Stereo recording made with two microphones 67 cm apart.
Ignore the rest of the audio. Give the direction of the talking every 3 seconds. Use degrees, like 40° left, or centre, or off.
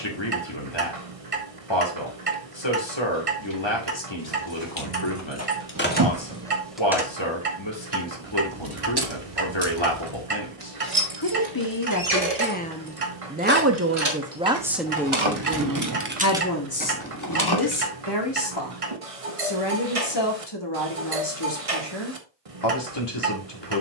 40° left, 40° left, 40° left, 40° left, centre, 20° left, 40° left, 40° left.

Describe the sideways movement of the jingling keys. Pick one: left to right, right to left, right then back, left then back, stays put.
right then back.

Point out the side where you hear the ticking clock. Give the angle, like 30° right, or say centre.
60° right.